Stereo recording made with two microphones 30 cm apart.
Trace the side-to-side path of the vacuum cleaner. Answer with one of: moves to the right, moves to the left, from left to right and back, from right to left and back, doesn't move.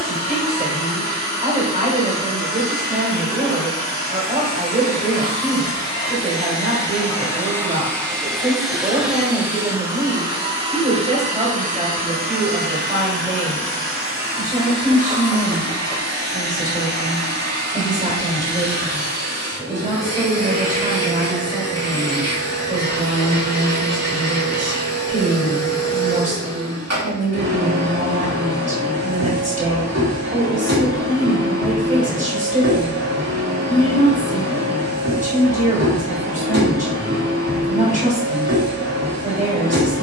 moves to the right.